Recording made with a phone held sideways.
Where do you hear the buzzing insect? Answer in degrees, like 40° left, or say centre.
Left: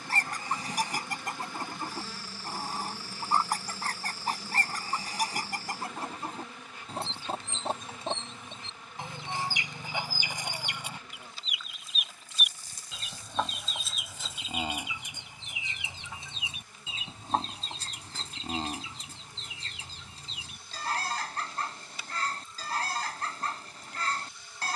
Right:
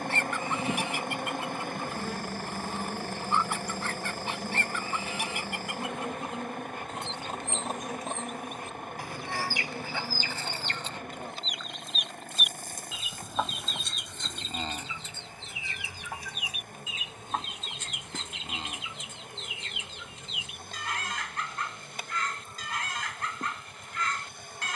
50° right.